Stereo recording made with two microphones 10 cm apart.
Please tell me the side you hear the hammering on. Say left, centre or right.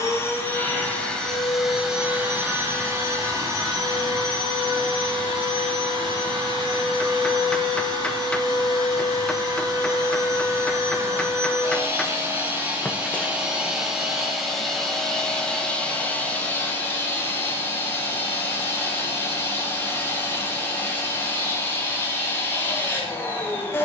centre.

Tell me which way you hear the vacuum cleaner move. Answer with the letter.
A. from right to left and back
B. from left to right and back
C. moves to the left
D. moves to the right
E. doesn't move
B.